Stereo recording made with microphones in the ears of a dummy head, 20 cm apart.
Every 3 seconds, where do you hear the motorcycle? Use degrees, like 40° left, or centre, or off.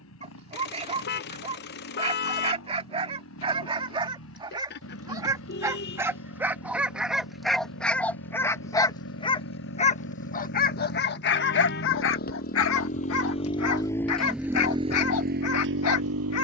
70° left, 60° left, 60° left, 50° left, 20° left, 50° right.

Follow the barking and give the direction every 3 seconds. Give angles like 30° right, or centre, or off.
30° right, 20° right, centre, 40° left, 70° left, 70° left.